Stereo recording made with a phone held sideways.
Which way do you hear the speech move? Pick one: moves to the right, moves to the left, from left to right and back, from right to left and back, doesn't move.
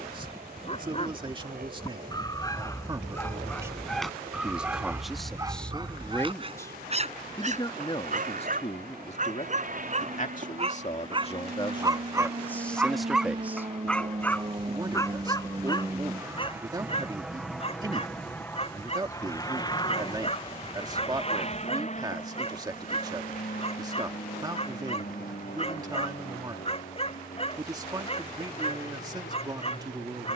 from right to left and back.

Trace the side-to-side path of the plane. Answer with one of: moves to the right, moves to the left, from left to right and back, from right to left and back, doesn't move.
moves to the left.